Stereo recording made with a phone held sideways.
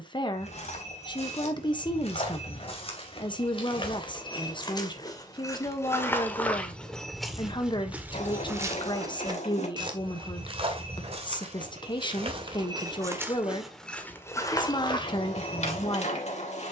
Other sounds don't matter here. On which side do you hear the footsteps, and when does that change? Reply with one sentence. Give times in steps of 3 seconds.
In this clip you hear the footsteps on the left from 0 s, in the centre from 6 s, on the right from 9 s, in the centre from 12 s and on the left from 15 s.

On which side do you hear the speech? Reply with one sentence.
In this clip you hear the speech on the left.